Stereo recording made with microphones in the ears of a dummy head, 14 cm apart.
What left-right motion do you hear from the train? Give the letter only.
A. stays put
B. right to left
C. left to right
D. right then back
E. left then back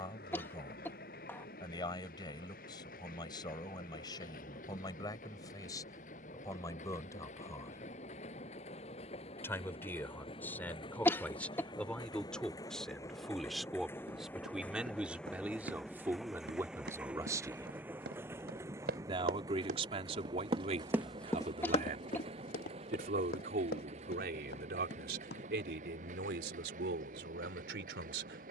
C.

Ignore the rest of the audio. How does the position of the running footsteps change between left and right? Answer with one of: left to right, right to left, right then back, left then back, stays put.
right to left.